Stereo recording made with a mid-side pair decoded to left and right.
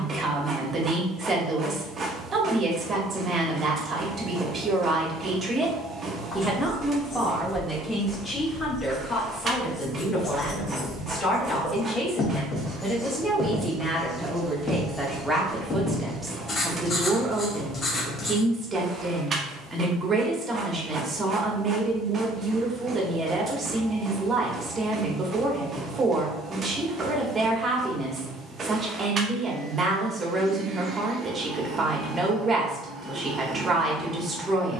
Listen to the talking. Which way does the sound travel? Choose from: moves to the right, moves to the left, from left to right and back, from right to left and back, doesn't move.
from right to left and back.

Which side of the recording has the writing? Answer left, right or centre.
left.